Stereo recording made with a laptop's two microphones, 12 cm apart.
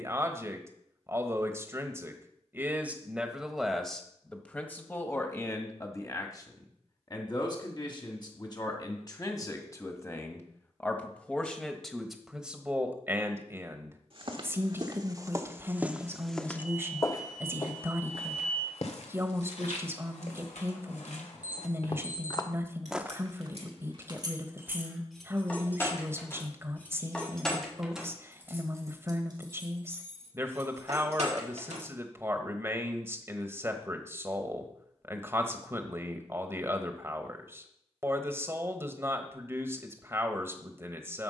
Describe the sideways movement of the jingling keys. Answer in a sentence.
You can hear the jingling keys move from right to left and back again.